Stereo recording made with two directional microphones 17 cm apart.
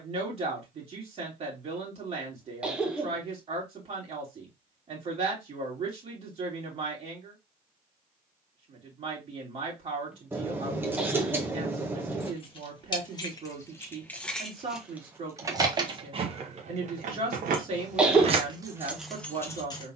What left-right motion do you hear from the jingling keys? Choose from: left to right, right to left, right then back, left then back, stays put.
right then back.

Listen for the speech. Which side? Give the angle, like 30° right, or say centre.
40° right.